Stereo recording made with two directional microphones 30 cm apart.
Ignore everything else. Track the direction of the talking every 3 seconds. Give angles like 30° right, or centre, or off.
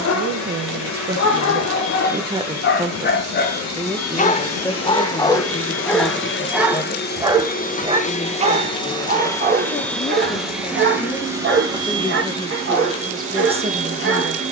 30° right, 10° left, 20° left, 20° left, 10° right.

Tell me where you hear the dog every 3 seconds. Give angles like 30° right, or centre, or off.
50° left, 20° left, 10° right, 30° right, 40° right.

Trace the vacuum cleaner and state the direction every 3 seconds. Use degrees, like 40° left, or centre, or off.
70° left, 50° left, 30° left, centre, 20° right.